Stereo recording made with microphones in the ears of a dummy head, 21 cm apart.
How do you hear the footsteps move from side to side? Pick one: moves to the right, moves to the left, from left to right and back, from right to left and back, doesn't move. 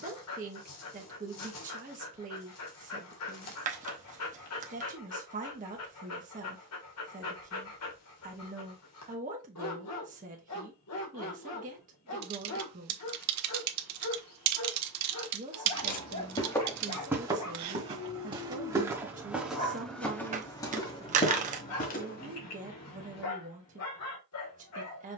from left to right and back.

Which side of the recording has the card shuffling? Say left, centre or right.
right.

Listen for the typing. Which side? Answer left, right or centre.
right.